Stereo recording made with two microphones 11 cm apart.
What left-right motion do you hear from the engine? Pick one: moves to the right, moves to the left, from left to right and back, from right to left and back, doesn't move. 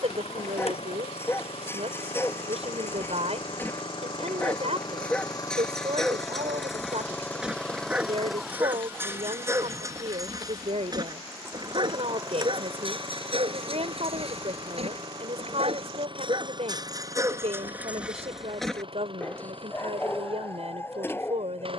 moves to the right.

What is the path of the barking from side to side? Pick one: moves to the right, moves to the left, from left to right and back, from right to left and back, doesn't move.
from left to right and back.